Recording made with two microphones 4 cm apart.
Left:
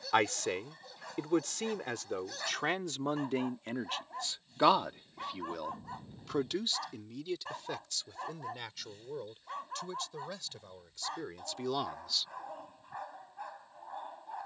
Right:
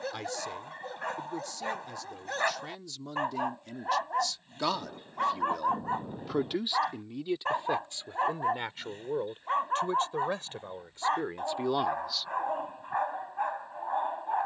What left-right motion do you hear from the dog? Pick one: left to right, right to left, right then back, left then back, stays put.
stays put.